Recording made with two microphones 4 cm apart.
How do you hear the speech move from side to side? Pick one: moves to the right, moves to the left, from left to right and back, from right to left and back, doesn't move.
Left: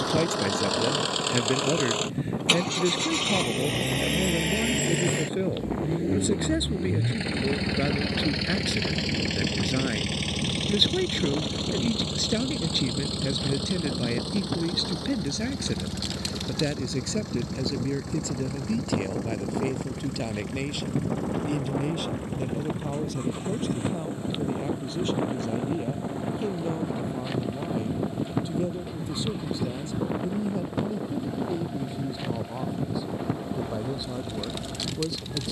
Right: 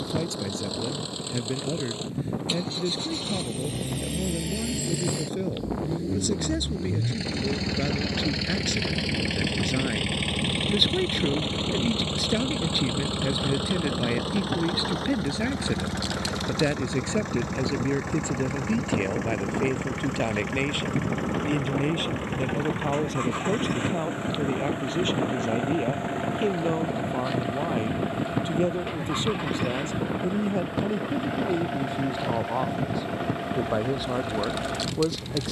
moves to the right.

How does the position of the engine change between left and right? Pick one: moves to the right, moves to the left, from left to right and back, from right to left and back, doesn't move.
moves to the right.